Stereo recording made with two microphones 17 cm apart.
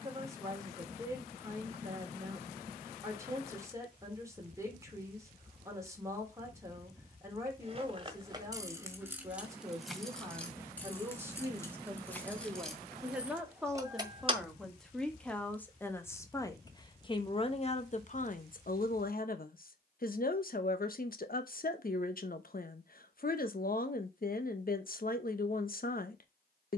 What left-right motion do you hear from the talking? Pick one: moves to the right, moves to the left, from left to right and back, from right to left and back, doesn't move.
moves to the left.